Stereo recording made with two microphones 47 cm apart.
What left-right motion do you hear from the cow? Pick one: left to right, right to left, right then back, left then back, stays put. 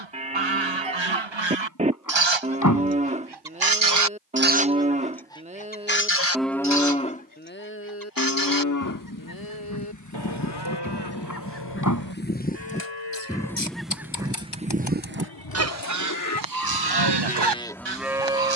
left then back.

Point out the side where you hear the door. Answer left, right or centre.
left.